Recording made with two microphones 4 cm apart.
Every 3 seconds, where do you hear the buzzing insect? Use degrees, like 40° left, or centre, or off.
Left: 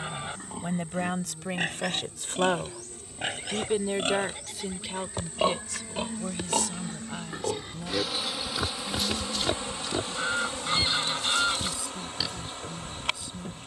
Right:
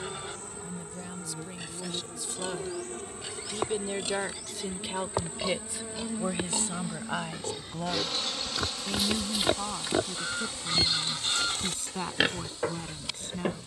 50° right, 40° right, centre, 40° left, 50° left.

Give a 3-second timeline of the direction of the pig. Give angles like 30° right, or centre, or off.
60° left, 50° left, 20° left, 30° right, 60° right.